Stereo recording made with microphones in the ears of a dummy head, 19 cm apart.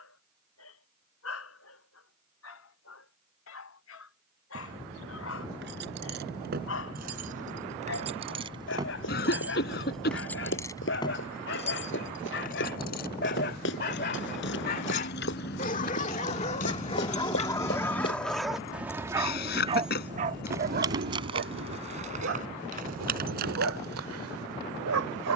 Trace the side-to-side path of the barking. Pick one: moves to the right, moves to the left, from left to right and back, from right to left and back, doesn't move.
moves to the right.